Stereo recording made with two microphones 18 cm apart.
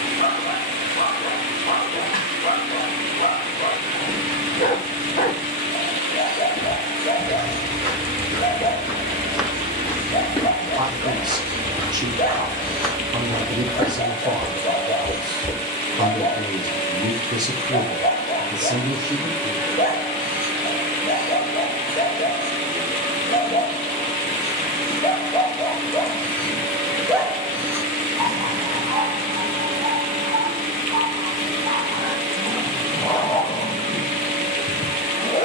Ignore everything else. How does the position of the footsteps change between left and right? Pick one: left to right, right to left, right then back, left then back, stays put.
left then back.